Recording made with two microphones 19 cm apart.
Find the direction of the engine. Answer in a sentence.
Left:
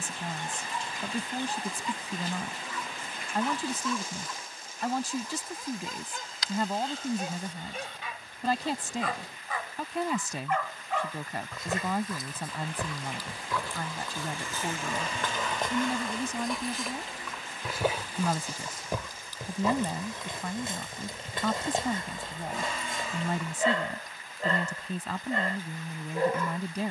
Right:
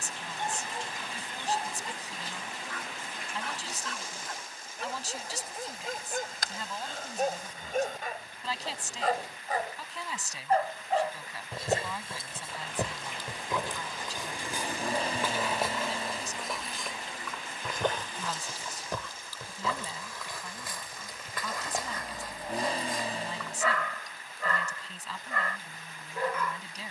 In this clip you hear the engine on the right.